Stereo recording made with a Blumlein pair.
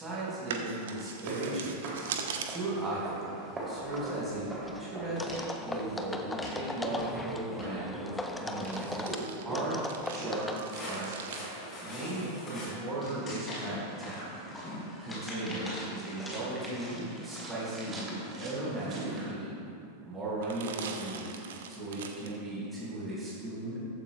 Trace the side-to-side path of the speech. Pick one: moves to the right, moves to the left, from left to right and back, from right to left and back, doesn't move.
doesn't move.